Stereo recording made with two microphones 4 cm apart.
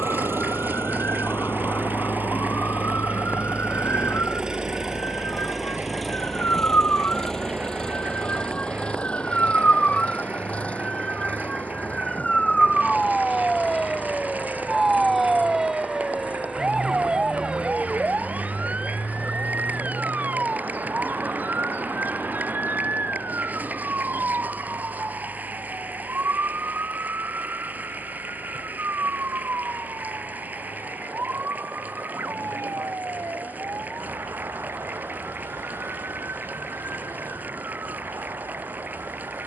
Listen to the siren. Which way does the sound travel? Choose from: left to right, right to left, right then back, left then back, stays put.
left to right.